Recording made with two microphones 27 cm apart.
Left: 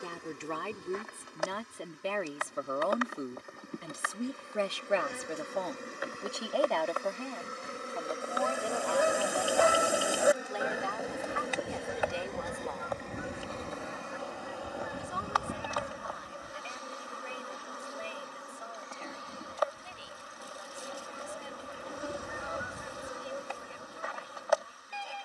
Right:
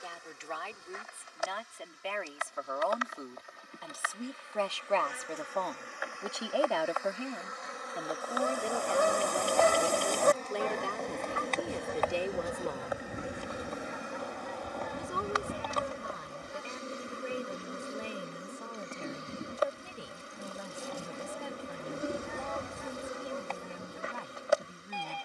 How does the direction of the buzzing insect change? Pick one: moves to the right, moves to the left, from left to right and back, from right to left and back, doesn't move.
moves to the right.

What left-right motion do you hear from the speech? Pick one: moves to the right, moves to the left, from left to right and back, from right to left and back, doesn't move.
moves to the right.